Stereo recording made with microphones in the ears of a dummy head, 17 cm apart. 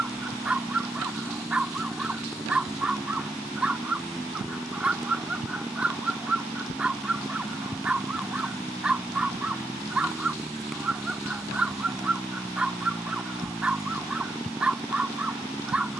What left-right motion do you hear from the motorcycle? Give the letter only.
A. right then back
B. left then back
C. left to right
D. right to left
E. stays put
E.